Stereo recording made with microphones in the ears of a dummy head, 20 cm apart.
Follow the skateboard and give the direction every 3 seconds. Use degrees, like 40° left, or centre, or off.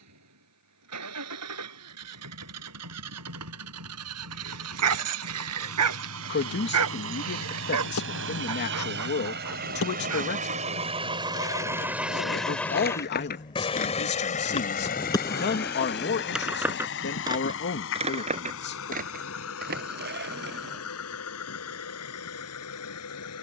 off, off, 70° left, 60° left, 40° left, centre, 40° right, off.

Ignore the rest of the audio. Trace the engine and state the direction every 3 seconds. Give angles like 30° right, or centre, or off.
80° right, 70° right, 60° right, 30° right, 20° left, 50° left, 60° left, 70° left.